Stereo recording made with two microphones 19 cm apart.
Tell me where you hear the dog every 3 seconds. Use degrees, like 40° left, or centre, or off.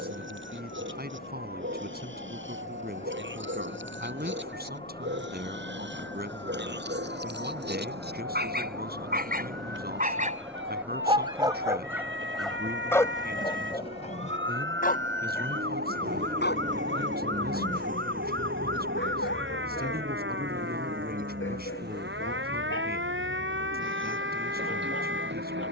80° right, 70° right, 60° right, 30° right, 20° left, 60° left, 70° left, 80° left, 80° left.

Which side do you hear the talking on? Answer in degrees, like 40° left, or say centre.
50° right.